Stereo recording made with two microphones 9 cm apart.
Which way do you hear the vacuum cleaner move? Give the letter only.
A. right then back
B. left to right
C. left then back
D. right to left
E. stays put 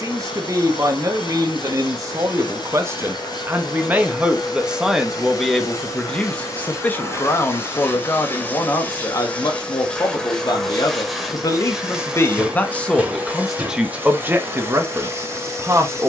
B.